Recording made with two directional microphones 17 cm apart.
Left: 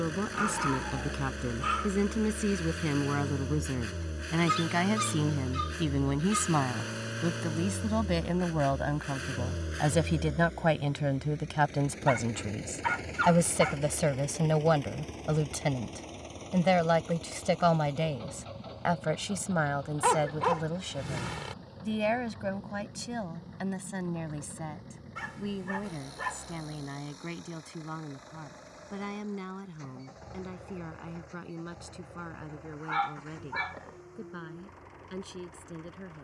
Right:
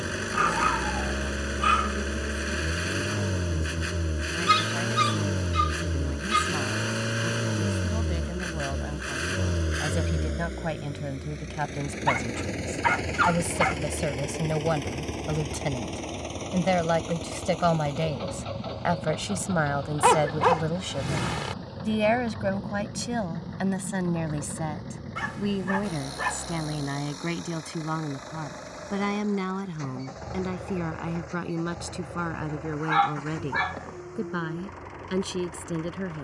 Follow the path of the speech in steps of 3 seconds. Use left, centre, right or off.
left, left, left, left, centre, centre, right, right, right, right, right, right.